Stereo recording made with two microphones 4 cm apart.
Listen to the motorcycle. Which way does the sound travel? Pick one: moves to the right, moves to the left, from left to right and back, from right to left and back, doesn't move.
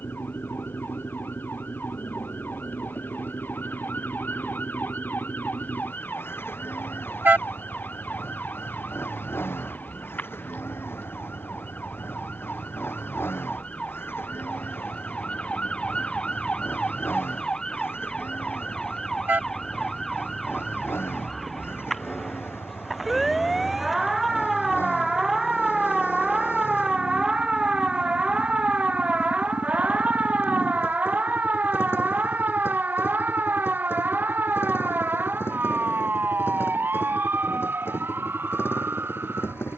doesn't move.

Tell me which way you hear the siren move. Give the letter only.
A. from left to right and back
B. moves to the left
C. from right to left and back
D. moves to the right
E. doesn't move
D.